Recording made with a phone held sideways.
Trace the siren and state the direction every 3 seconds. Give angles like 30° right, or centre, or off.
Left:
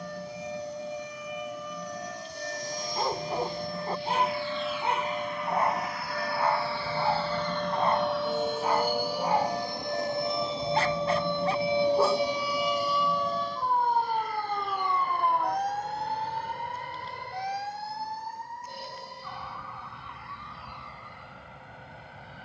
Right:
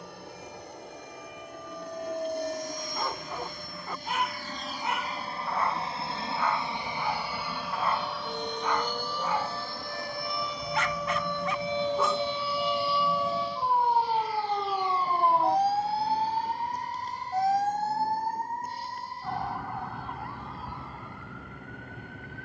80° left, 70° left, 60° left, 30° left, 10° right, 40° right, 50° right, 60° right.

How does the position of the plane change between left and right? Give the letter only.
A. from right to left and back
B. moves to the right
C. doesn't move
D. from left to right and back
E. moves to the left
E.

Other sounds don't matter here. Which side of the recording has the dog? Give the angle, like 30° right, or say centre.
30° left.